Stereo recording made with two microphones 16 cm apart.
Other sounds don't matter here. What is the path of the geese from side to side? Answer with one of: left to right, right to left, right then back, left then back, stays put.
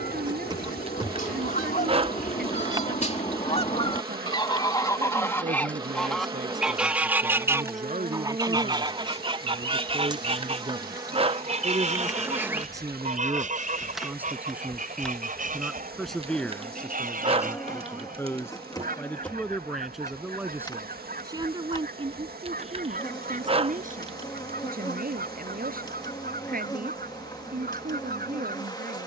left to right.